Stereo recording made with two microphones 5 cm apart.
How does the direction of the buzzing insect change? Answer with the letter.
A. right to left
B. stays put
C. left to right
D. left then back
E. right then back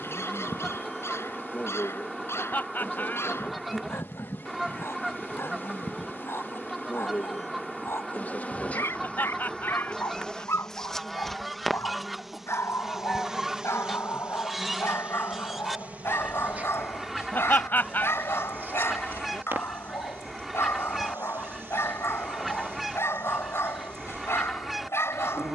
C.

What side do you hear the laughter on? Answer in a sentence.
You can hear the laughter on the left.